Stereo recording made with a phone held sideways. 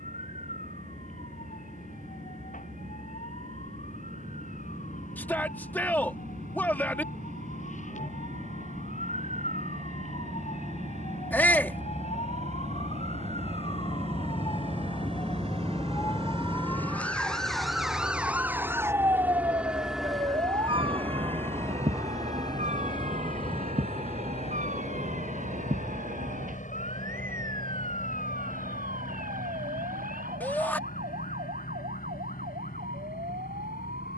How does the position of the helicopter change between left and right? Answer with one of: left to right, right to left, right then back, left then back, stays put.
right to left.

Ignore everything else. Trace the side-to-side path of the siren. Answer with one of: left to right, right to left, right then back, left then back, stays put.
left to right.